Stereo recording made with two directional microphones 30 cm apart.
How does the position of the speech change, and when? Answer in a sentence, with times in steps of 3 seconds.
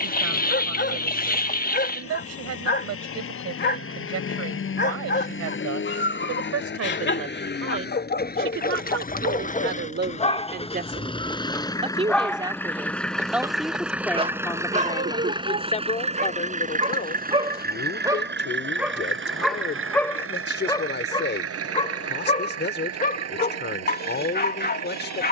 You can hear the speech on the right from 0 s, in the centre from 12 s and on the left from 15 s.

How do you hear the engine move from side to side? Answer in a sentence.
In this clip you hear the engine go from the left side to the right.